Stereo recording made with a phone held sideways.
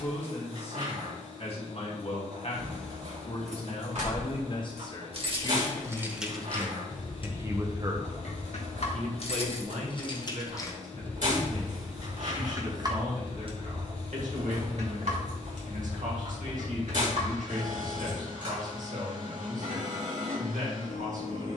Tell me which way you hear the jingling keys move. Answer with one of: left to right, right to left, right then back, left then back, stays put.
left then back.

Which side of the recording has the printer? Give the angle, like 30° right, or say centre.
70° right.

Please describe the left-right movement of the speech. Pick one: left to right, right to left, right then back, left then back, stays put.
left to right.